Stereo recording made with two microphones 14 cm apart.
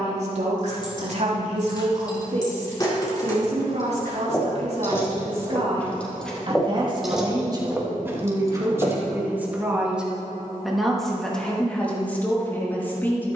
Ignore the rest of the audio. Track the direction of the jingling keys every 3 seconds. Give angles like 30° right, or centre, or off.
30° left, 20° left, 10° right, off, off.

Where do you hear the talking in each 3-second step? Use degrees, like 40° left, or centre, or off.
50° right, 50° right, 30° right, centre, 10° left.